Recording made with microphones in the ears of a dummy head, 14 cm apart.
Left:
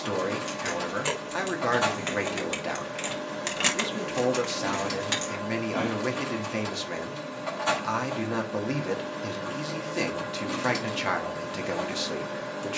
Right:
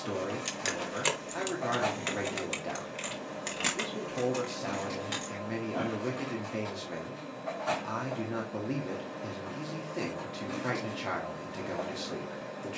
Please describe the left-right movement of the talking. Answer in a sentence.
In this clip you hear the talking stay in one place.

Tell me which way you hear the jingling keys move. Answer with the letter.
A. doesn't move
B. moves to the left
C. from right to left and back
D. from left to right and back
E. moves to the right
B.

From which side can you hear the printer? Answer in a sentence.
You can hear the printer on the left.